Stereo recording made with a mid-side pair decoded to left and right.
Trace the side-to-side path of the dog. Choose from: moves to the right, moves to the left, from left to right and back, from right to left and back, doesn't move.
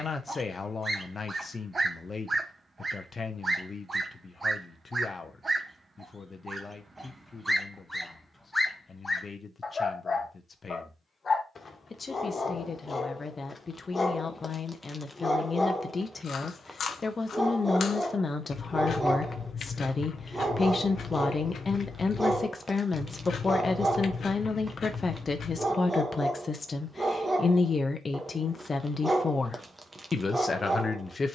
from right to left and back.